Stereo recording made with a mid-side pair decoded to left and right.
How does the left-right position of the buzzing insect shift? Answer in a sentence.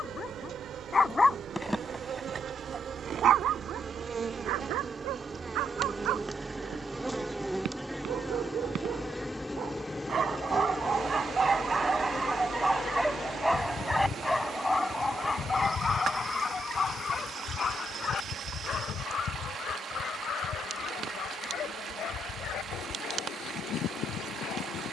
In this clip you hear the buzzing insect go from the right side to the left.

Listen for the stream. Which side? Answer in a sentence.
You can hear the stream on the right.